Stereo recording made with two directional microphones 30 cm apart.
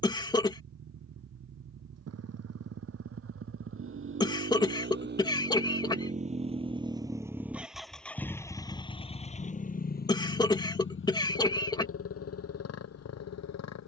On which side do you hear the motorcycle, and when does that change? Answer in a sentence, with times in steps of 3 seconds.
In this clip you hear the motorcycle on the right from 0 s, in the centre from 6 s and on the left from 9 s.